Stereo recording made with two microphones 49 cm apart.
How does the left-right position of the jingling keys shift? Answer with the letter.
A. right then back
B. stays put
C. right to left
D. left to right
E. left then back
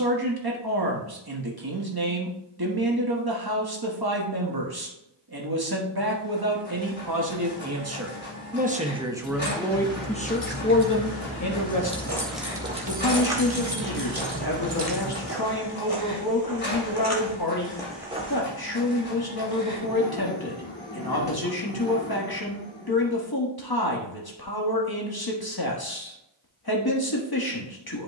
D.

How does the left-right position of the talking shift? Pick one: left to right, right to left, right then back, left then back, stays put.
right to left.